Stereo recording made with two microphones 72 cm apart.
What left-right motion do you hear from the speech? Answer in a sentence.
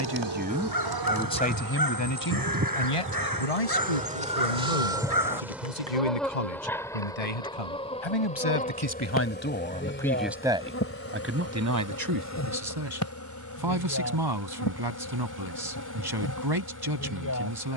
You can hear the speech go left and come back.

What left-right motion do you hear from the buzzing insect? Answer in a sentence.
In this clip you hear the buzzing insect move to the left.